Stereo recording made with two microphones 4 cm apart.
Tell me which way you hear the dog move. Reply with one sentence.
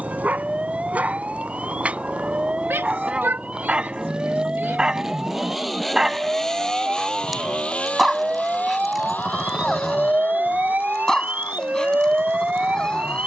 You can hear the dog move to the left.